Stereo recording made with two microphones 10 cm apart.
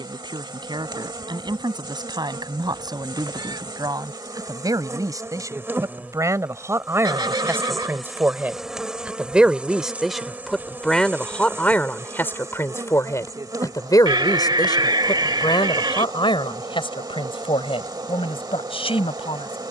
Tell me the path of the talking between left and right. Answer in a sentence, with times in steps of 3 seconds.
You can hear the talking on the right from 0 s, in the centre from 9 s and on the left from 12 s.